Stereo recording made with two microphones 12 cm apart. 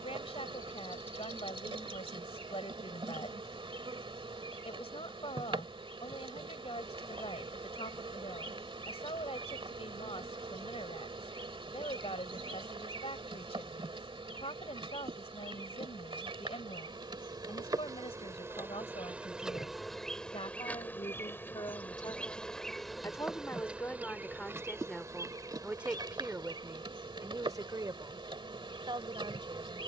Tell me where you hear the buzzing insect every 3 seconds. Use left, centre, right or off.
right, right, right, right, right, right, centre, centre, right, right.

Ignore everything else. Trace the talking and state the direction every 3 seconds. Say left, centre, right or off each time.
left, left, left, left, left, left, left, left, centre, right.